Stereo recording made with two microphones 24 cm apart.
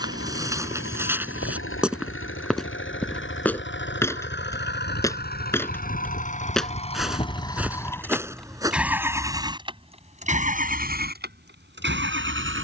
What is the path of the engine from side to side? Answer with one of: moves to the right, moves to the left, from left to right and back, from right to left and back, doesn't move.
moves to the right.